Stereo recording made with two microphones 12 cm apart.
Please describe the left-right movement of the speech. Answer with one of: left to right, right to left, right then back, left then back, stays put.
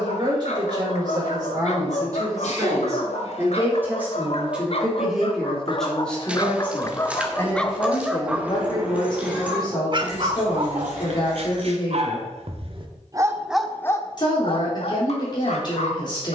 right to left.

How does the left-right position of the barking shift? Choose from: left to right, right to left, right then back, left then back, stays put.
right then back.